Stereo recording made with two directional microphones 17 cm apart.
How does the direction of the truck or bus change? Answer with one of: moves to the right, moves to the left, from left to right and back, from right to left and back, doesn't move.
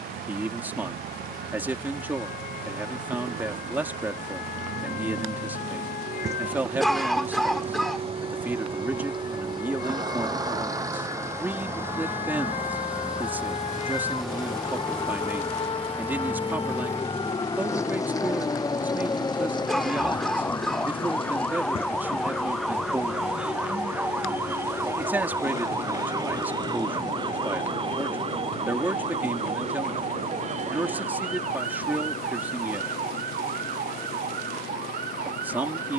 moves to the left.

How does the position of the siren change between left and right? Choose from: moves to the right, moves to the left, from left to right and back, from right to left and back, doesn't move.
moves to the right.